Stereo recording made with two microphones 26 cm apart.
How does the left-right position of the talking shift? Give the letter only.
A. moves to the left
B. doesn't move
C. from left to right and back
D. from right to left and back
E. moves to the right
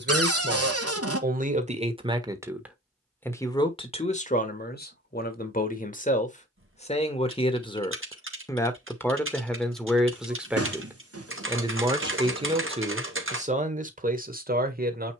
D.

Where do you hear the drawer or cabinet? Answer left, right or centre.
right.